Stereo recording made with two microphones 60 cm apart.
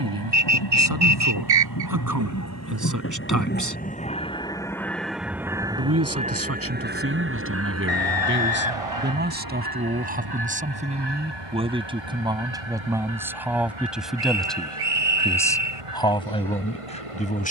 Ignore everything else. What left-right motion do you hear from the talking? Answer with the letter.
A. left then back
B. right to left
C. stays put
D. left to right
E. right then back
B.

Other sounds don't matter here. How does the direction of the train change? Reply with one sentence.
In this clip you hear the train travel towards the right.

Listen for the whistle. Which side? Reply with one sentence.
You can hear the whistle on the right.